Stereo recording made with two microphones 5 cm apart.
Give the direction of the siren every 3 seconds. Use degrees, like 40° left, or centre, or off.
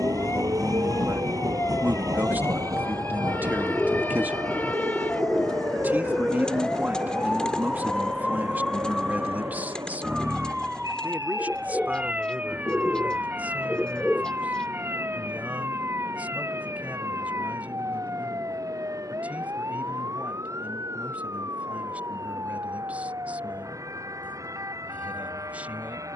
50° left, 30° left, 10° left, 10° right, 30° right, 50° right, 50° right, 60° right, 70° right.